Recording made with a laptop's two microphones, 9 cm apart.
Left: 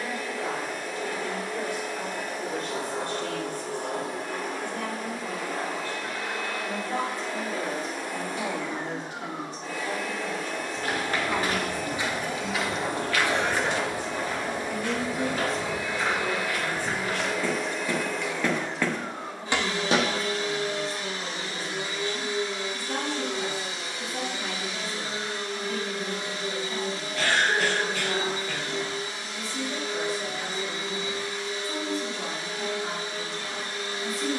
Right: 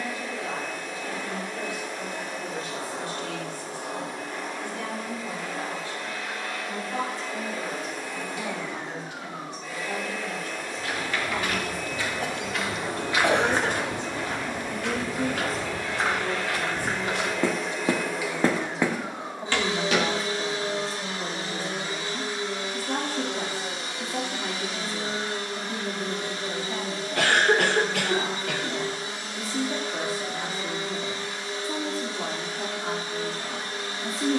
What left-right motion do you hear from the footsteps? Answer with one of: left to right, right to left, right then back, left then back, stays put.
right then back.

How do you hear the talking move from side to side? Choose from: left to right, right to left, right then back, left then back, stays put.
left to right.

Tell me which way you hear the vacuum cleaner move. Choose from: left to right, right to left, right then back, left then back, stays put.
left to right.